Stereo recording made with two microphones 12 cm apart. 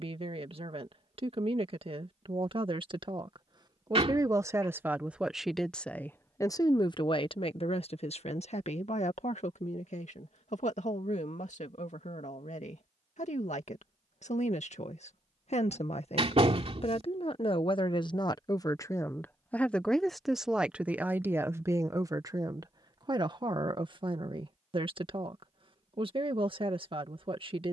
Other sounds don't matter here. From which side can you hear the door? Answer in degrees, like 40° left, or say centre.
50° right.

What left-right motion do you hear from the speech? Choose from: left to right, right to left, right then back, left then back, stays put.
left then back.